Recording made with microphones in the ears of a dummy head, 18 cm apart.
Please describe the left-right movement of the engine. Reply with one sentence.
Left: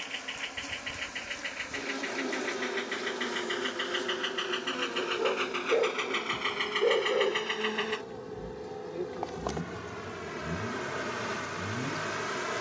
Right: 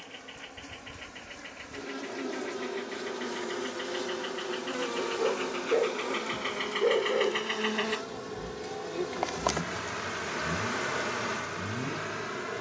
In this clip you hear the engine go from the left side to the right.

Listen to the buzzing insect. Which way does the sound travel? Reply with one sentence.
In this clip you hear the buzzing insect go right and come back.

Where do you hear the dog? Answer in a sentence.
In this clip you hear the dog in the centre.